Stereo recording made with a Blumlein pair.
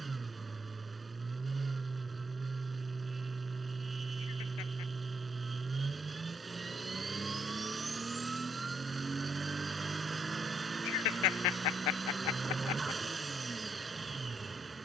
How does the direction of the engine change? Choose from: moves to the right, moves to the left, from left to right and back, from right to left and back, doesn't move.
doesn't move.